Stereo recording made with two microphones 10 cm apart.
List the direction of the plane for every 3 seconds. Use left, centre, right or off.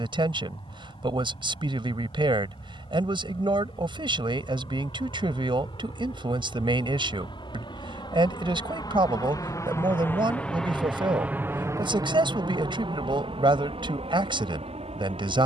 left, left, left, centre, right.